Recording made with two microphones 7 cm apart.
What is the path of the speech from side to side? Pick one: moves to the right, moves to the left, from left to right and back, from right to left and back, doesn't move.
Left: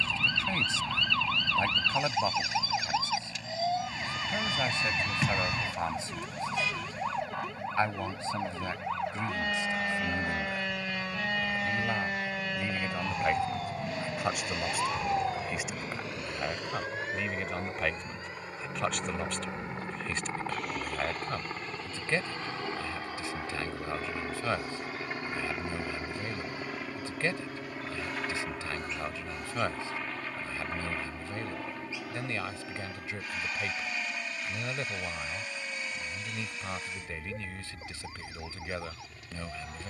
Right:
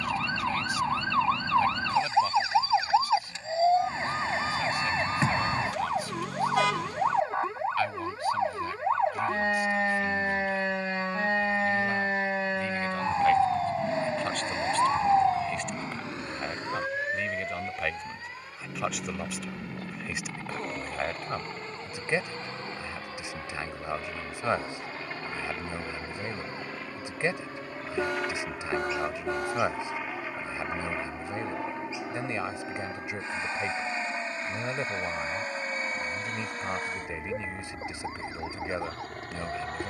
moves to the right.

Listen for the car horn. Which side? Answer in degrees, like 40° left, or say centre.
70° right.